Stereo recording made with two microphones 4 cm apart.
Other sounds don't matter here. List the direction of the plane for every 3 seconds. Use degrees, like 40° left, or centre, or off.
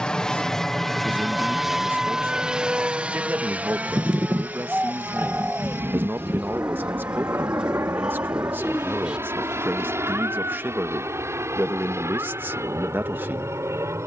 centre, 40° right, 60° right, 70° right, 70° right.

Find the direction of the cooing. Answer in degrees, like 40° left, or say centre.
20° right.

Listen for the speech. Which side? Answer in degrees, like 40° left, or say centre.
50° right.